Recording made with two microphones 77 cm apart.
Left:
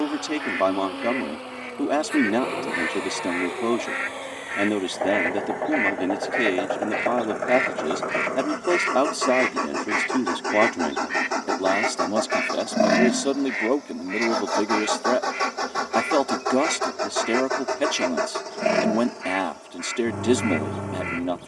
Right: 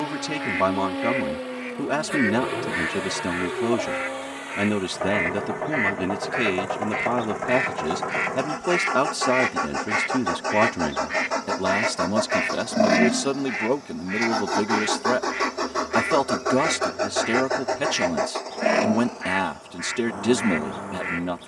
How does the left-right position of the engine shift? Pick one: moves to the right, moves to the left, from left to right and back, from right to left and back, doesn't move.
moves to the left.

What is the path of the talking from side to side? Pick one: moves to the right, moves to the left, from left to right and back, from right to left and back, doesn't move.
doesn't move.